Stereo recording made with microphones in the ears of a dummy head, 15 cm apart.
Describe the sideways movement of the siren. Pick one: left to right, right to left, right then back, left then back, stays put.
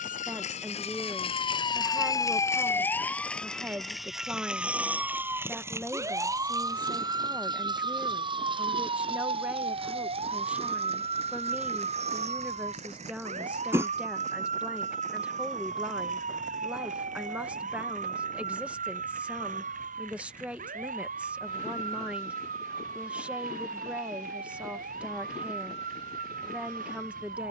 left to right.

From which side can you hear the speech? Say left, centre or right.
centre.